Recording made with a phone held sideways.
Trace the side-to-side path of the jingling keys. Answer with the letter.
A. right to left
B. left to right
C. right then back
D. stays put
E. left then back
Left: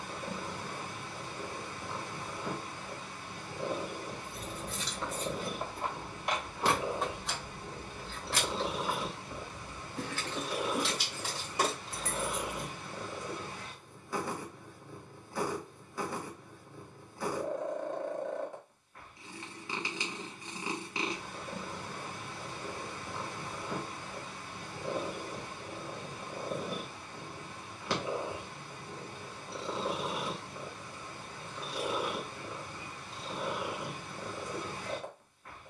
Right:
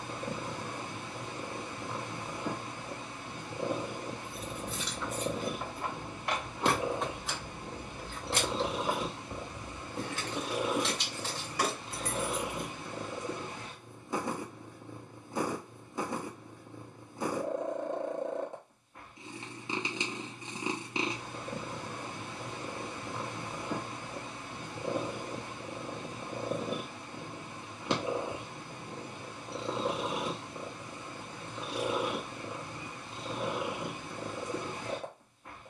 C.